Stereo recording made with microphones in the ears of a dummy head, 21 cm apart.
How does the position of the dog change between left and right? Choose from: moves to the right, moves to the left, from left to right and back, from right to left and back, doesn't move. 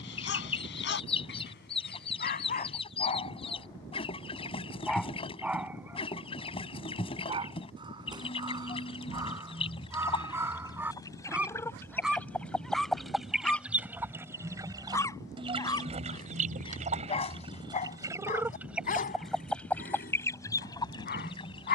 from left to right and back.